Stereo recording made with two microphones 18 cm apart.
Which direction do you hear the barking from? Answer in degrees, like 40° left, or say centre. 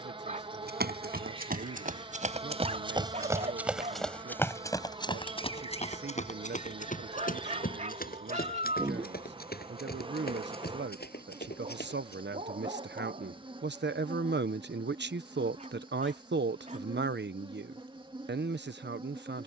40° right.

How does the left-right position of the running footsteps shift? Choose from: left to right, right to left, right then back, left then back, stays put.
right to left.